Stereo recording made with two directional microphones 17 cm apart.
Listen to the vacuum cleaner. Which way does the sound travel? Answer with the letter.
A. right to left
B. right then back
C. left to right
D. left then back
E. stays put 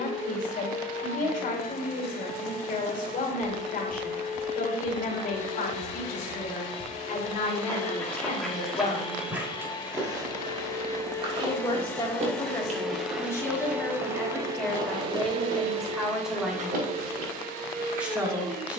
C.